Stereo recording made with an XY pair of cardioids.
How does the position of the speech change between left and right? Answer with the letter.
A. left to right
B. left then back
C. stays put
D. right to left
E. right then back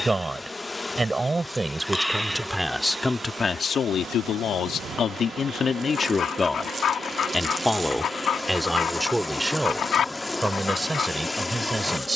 B.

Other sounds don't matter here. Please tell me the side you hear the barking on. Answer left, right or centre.
left.